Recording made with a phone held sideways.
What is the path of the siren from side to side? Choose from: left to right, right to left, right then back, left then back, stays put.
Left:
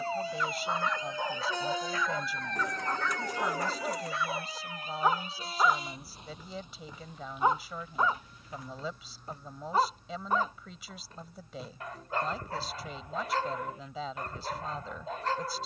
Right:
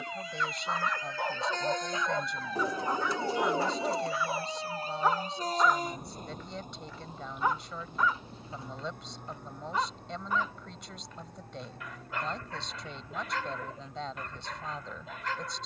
left to right.